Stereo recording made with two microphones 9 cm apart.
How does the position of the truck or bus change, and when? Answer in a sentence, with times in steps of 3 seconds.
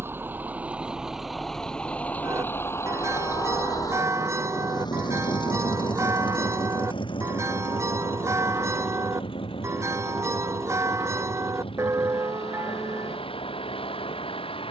In this clip you hear the truck or bus in the centre from 0 s and on the left from 3 s.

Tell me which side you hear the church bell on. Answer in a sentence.
In this clip you hear the church bell on the right.